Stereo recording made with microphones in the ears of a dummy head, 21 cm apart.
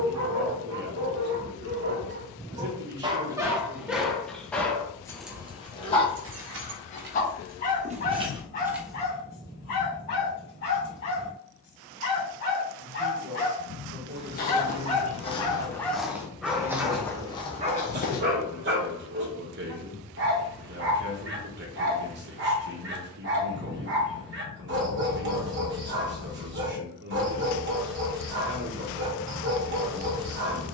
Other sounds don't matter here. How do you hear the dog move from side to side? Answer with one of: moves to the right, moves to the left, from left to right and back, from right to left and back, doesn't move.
from right to left and back.